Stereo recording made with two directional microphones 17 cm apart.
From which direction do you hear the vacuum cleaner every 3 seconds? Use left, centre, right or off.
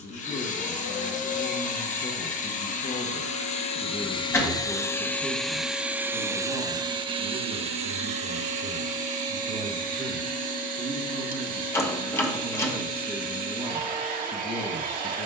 left, left, right, right, right.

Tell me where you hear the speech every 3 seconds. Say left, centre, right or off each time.
left, centre, right, right, centre.